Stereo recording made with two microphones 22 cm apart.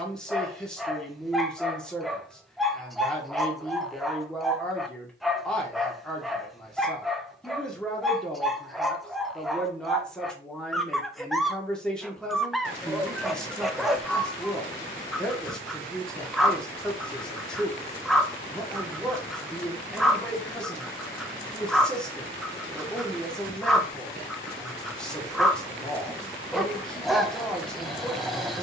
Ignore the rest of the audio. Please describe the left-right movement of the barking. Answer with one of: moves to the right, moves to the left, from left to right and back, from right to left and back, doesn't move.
doesn't move.